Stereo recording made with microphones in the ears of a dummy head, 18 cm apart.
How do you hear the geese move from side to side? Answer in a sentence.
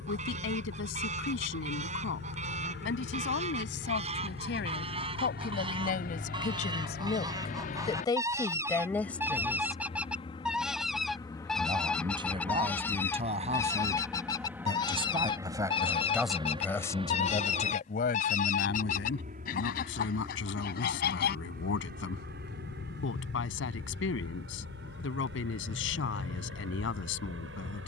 You can hear the geese move from right to left.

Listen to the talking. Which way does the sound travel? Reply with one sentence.
You can hear the talking move from left to right and back again.